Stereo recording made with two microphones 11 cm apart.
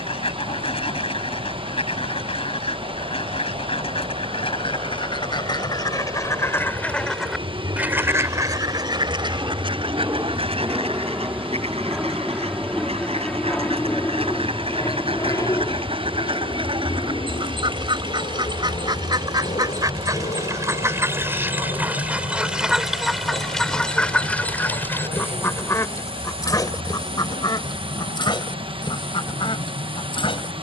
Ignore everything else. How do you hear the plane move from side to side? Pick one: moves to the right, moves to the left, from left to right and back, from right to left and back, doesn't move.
moves to the left.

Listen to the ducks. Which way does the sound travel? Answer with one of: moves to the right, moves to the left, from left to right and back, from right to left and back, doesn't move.
from left to right and back.